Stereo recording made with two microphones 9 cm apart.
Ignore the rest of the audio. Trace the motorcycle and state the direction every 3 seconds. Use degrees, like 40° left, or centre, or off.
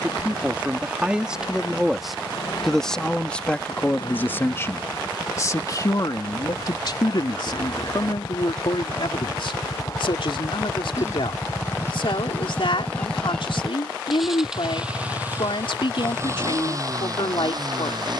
60° left, 60° left, 50° left, 40° left, 10° left, 30° right.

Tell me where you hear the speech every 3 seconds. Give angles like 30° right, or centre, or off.
10° right, 30° left, 60° left, 70° left, 80° left, 80° left.